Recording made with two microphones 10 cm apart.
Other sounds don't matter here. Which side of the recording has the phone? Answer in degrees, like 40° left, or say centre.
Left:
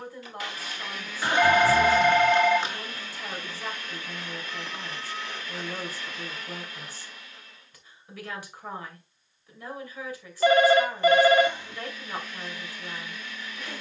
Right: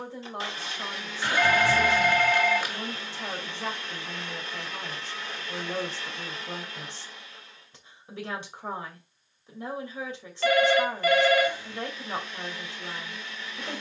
20° left.